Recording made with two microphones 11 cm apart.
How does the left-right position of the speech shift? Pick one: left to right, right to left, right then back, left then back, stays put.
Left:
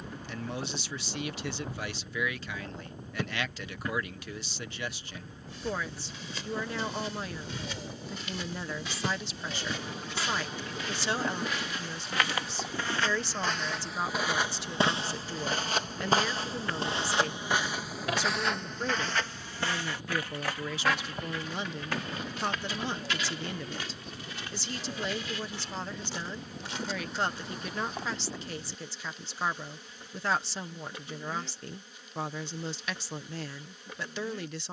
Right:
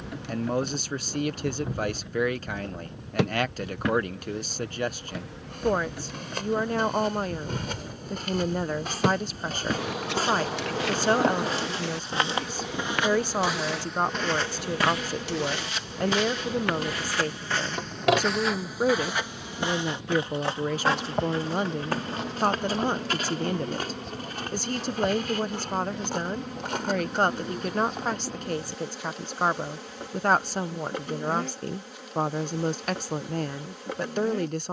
stays put.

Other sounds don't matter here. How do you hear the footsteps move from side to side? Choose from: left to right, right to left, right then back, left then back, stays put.
left then back.